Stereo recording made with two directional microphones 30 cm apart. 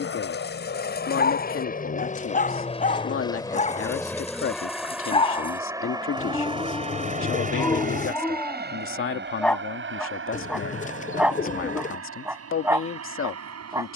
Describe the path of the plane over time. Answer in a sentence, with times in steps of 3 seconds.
You can hear the plane on the left from 0 s, in the centre from 3 s and on the right from 6 s.